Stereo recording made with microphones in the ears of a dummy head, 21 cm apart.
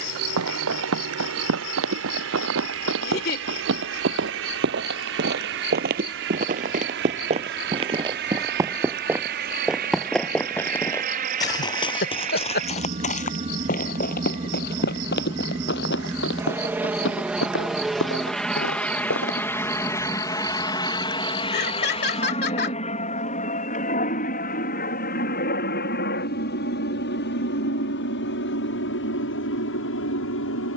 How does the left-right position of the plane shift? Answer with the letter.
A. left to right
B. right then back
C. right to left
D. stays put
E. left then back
C.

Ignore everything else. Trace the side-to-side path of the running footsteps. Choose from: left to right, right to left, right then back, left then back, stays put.
right to left.